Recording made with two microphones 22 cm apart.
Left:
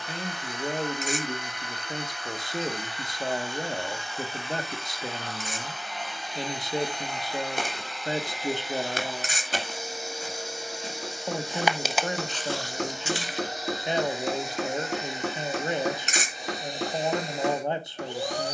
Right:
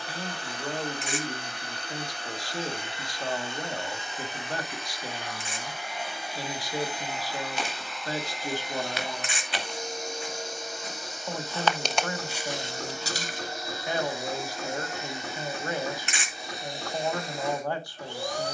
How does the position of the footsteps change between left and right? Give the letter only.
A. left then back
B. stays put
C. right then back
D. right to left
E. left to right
E.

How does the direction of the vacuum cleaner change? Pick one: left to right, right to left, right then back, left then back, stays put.
right to left.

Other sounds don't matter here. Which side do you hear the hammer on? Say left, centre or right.
left.